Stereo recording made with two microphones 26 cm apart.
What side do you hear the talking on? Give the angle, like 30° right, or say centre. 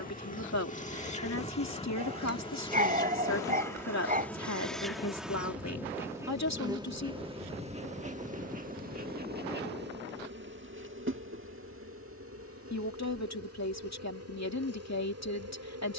80° left.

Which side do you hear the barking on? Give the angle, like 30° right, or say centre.
30° right.